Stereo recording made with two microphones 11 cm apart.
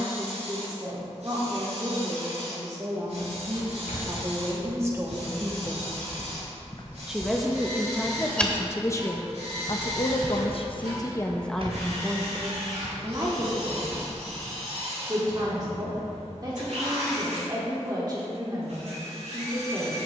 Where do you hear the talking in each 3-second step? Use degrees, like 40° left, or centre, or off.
40° right, 30° right, 10° left, 30° left, 30° right, 40° right, 40° right.